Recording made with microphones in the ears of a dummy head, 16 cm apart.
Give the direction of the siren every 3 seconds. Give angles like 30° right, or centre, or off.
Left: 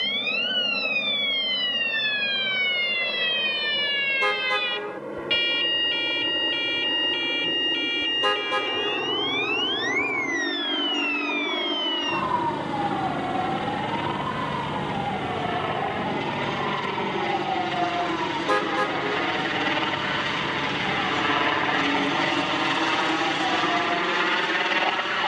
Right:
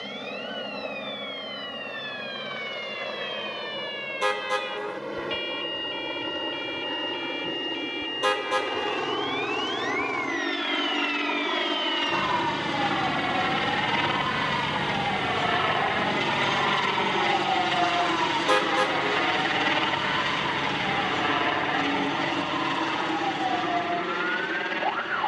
50° left, 50° left, 30° left, 20° left, centre, 20° right, 30° right, 40° right, 50° right.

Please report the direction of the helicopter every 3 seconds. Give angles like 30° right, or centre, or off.
80° right, 80° right, 70° right, 70° right, 60° right, 40° right, 20° right, 20° left, 40° left.